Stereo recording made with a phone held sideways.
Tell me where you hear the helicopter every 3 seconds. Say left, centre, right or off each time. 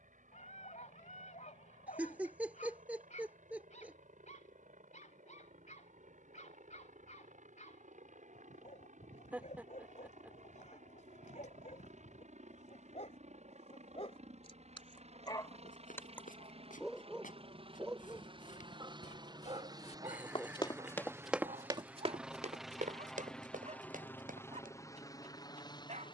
right, right, right, right, right, right, right, centre, left.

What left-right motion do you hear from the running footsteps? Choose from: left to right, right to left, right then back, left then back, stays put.
left to right.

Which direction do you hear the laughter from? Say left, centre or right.
centre.